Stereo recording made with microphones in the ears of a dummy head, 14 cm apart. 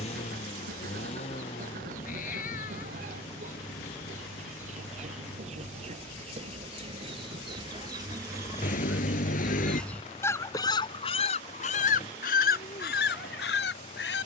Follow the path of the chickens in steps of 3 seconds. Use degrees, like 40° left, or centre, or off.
50° right, 50° right, 30° right, 30° left, 70° left.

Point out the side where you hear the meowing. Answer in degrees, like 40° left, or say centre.
60° left.